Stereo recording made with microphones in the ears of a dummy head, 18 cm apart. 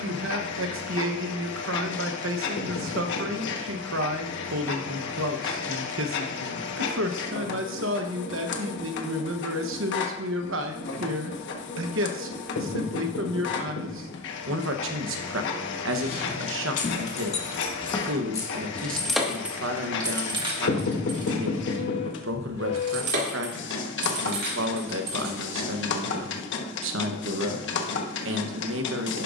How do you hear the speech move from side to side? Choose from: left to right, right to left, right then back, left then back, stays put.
stays put.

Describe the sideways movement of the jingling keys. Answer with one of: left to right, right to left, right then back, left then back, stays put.
left to right.